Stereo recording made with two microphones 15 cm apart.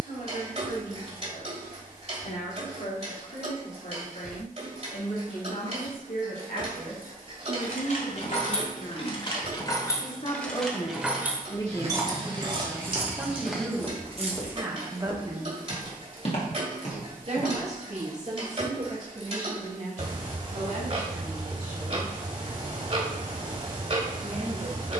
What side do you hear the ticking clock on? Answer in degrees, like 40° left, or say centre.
40° right.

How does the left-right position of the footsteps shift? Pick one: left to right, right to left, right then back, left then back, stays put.
right to left.